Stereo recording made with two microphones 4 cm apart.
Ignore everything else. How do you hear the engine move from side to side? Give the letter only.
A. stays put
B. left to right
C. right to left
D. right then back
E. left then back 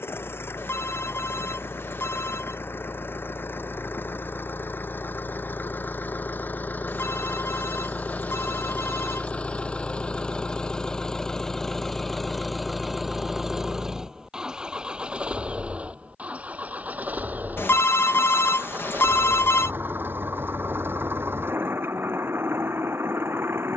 B.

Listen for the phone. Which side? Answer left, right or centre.
left.